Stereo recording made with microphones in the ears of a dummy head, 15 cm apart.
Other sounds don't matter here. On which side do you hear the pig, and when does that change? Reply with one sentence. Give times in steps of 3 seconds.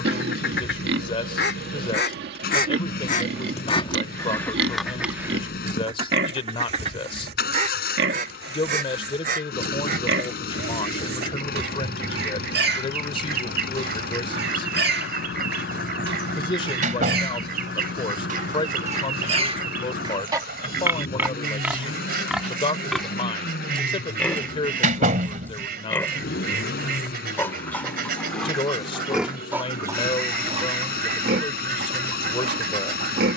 In this clip you hear the pig on the right from 0 s, in the centre from 21 s and on the right from 30 s.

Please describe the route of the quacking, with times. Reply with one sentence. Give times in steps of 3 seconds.
In this clip you hear the quacking on the left from 0 s, in the centre from 3 s and on the right from 6 s.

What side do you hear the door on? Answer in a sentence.
You can hear the door on the right.